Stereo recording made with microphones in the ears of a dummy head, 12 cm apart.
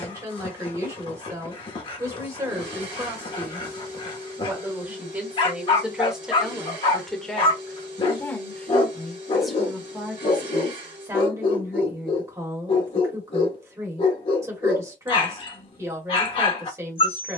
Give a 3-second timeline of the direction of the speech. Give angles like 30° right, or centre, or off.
20° right, 20° right, 10° left, 10° right, 20° right, 20° right.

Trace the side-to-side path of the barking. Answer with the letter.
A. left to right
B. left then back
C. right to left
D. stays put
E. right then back
D.